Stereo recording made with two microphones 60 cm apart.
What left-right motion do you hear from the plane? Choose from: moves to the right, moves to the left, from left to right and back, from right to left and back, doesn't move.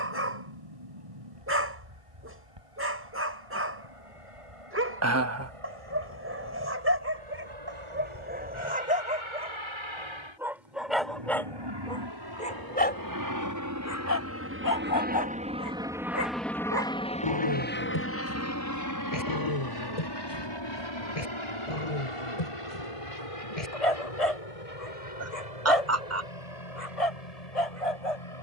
moves to the left.